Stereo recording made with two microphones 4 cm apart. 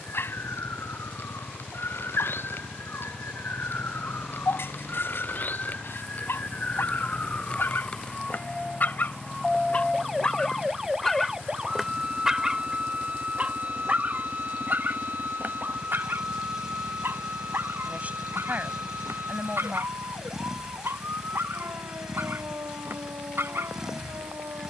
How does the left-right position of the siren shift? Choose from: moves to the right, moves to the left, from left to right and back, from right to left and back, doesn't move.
moves to the right.